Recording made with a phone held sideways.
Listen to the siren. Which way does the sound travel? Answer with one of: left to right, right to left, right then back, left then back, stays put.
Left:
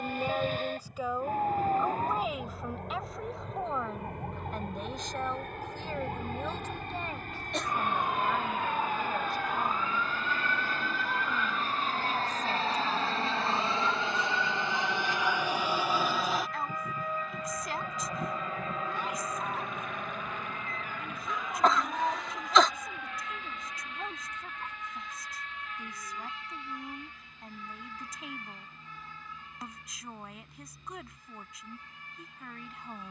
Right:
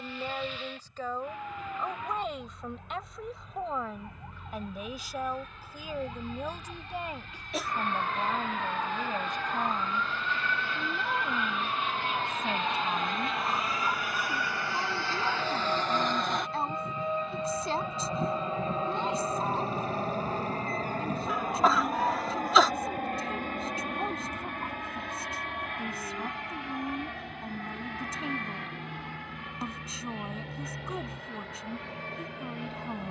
left to right.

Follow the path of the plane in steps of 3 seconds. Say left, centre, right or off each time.
left, left, left, left, left, centre, right, right, right, right, right.